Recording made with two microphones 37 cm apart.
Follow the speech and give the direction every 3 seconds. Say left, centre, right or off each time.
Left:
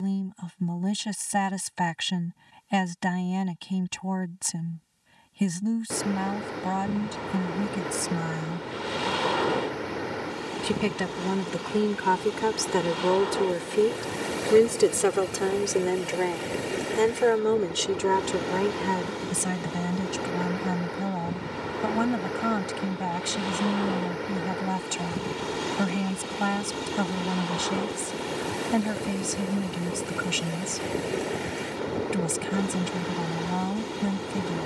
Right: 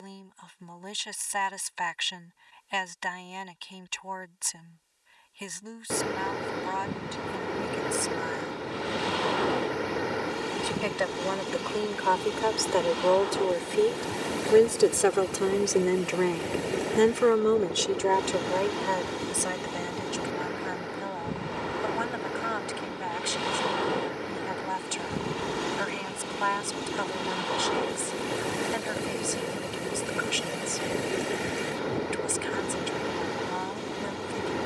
left, left, left, left, left, centre, left, left, left, left, left, left.